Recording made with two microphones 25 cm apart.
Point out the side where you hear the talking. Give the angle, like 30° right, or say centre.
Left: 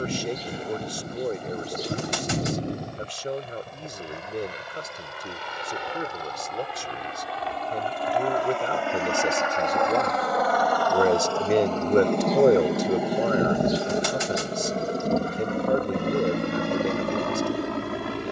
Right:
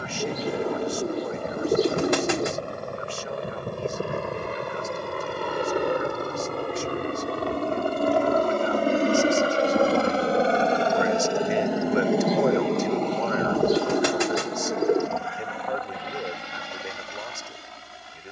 40° left.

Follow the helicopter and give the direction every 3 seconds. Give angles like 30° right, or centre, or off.
60° right, 60° right, 50° right, 30° right, 10° left, 50° left.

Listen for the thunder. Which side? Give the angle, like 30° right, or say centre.
40° left.